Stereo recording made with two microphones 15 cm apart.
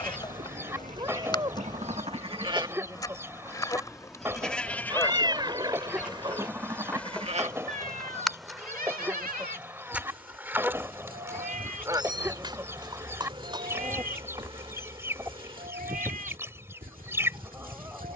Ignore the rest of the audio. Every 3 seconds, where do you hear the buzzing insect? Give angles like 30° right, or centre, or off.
30° left, 20° left, 10° left, 10° right, 30° right, 40° right.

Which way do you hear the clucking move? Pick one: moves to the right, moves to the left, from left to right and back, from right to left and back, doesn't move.
doesn't move.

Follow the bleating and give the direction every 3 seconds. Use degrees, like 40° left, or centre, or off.
50° right, centre, 40° right, 70° right, 70° right, 70° right.